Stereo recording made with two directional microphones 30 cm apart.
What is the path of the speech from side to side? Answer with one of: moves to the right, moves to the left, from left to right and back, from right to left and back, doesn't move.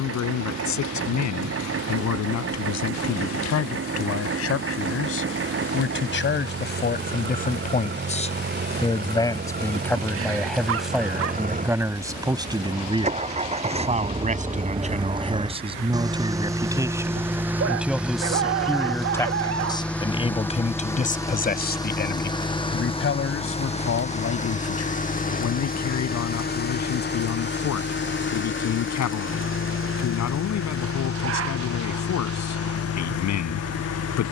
from left to right and back.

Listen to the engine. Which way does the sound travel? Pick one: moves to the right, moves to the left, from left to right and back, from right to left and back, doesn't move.
moves to the left.